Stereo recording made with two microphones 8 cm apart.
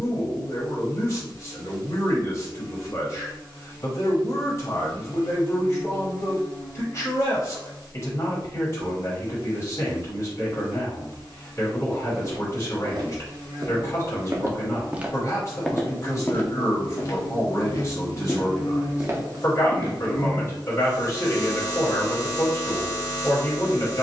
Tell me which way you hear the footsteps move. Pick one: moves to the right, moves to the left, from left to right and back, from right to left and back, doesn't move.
from right to left and back.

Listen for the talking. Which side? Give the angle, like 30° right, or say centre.
40° left.